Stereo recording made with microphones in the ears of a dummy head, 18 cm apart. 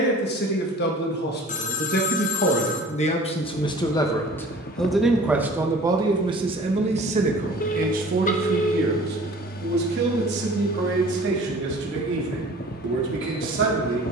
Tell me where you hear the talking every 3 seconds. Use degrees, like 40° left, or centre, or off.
50° left, 10° left, 40° right, 60° right, 70° right.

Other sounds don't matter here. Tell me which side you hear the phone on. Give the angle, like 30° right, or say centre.
40° left.